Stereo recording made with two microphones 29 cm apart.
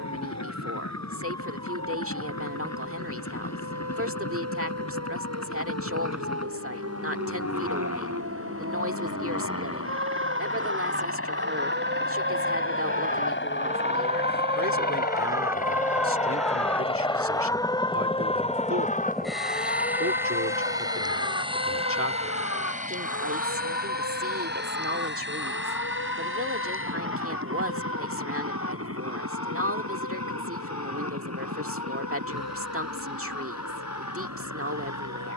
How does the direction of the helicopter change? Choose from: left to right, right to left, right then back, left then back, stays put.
left to right.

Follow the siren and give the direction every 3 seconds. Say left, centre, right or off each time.
right, right, right, right, right, centre, left, left, left, left, left, left.